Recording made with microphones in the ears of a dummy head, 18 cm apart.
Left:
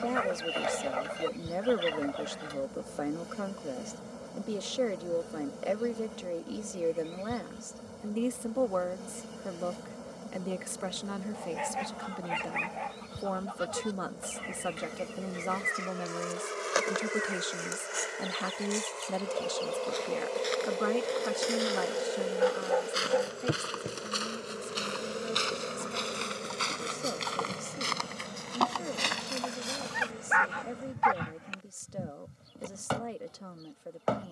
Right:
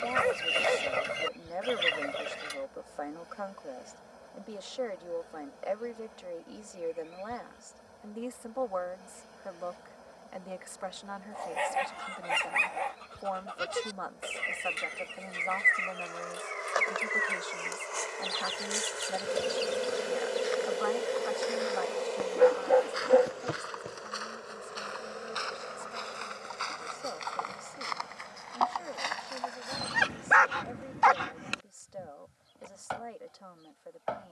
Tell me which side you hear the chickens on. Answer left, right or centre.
right.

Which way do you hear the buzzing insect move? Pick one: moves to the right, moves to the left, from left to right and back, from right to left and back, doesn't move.
from left to right and back.